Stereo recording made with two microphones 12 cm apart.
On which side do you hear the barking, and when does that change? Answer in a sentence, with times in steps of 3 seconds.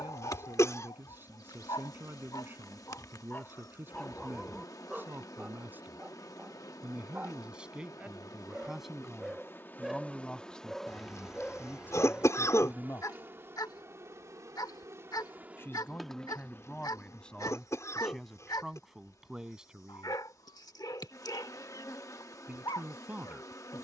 You can hear the barking on the left from 0 s, in the centre from 3 s and on the left from 12 s.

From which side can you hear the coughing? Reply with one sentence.
You can hear the coughing on the left.